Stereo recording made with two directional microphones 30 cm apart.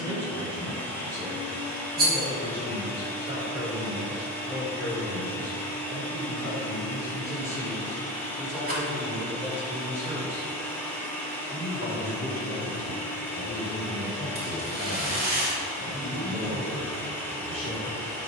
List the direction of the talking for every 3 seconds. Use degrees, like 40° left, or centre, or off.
20° right, centre, 10° left, 10° right, 20° right, 20° right.